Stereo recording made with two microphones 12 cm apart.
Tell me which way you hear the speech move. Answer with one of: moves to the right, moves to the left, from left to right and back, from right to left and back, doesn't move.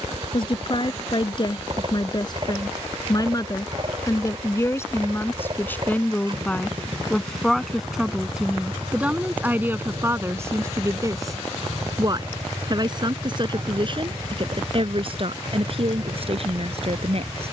moves to the right.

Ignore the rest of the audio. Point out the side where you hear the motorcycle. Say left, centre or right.
right.